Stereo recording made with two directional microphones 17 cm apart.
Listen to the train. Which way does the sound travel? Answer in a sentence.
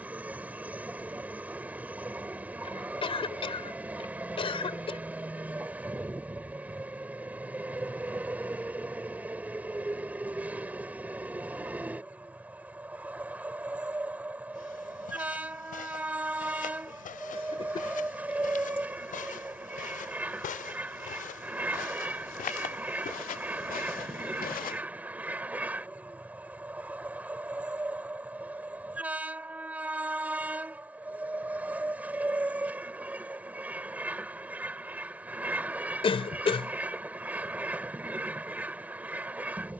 You can hear the train stay put.